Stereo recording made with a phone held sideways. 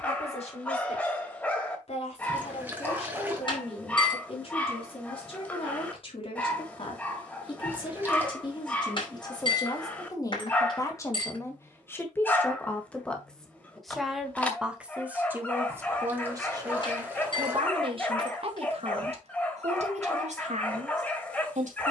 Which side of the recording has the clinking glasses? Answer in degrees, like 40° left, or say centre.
40° left.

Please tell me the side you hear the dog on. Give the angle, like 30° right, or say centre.
10° left.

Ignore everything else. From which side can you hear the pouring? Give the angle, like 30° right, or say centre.
10° right.